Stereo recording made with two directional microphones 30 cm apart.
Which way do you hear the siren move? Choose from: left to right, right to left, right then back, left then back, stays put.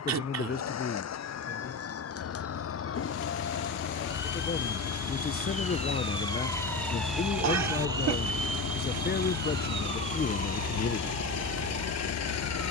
left to right.